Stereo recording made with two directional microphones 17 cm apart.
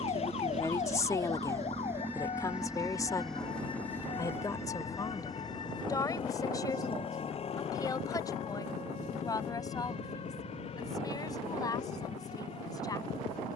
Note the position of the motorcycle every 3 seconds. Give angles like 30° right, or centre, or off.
20° right, 20° left, 40° left, 50° left, 50° left.